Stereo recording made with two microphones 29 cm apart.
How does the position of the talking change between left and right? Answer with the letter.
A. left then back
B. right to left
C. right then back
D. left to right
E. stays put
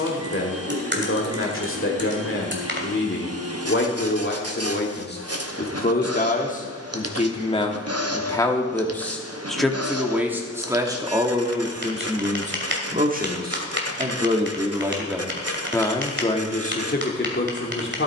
C.